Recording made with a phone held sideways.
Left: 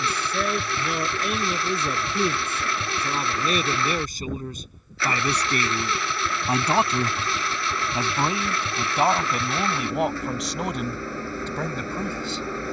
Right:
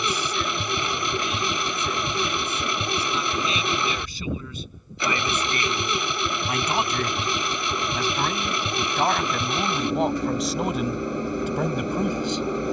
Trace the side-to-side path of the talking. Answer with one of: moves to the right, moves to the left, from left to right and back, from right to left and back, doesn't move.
moves to the right.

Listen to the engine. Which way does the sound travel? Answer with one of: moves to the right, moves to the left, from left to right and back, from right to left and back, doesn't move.
doesn't move.